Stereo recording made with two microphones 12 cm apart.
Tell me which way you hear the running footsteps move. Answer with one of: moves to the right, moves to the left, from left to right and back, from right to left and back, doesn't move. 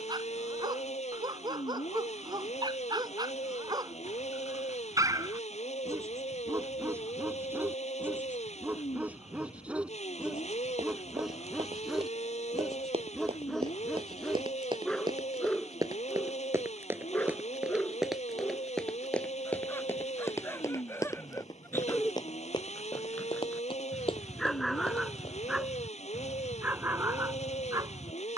moves to the left.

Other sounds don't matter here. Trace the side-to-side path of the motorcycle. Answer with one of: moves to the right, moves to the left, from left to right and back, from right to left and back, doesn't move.
doesn't move.